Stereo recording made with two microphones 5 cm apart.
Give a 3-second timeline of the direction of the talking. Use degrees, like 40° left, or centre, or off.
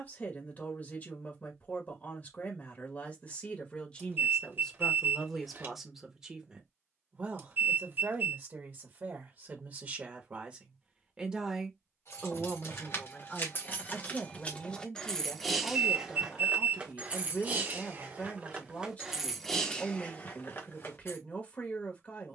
40° left, 10° left, 30° right, 30° right, 20° left, 30° left, 30° left, 30° left.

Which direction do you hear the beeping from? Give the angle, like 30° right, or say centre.
50° right.